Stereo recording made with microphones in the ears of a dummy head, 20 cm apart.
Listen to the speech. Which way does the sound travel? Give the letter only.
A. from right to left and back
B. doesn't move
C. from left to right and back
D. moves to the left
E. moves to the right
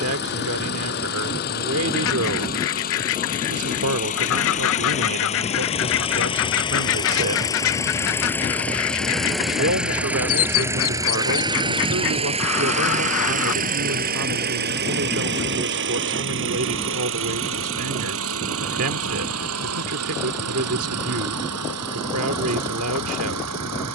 B.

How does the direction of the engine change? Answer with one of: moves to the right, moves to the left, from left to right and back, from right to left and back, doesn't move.
moves to the right.